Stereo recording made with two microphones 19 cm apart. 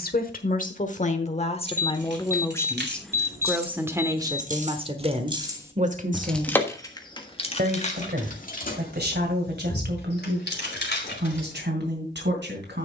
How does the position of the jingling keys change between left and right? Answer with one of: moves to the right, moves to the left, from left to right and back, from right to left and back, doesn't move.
moves to the left.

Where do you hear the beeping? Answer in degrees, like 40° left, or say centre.
10° right.